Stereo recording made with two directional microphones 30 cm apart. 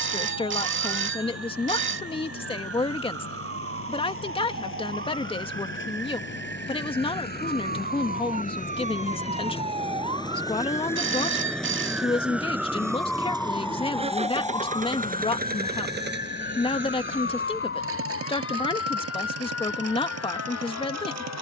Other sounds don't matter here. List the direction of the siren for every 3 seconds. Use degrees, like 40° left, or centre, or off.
50° right, 40° right, 30° right, 20° right, 10° left, 30° left, 50° left.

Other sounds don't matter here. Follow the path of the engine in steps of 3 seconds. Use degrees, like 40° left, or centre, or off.
50° left, 50° left, 30° left, 10° left, 10° right, 40° right, 50° right.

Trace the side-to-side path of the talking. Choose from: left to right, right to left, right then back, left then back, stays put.
stays put.